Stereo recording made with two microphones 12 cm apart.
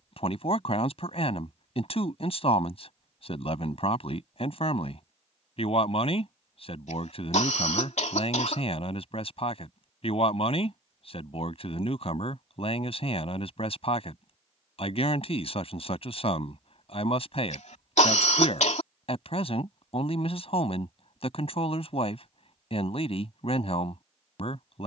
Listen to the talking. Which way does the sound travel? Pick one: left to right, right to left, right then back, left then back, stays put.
stays put.